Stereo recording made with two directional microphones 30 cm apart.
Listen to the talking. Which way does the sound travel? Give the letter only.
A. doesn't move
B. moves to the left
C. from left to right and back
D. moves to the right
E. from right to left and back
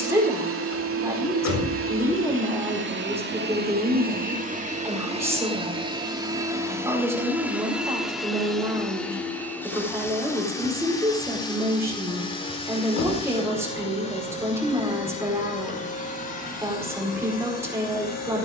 A.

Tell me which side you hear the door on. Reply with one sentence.
You can hear the door on the left.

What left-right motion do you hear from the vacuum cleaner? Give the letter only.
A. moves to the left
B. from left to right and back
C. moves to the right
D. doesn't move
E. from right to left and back
A.